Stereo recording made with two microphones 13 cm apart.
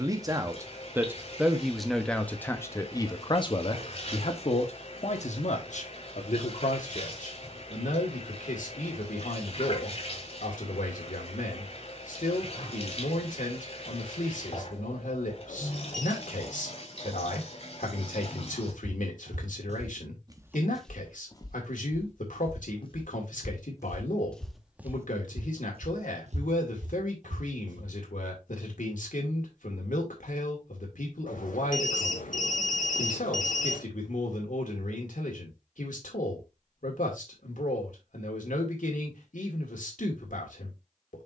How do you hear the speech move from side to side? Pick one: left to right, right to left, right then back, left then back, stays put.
right to left.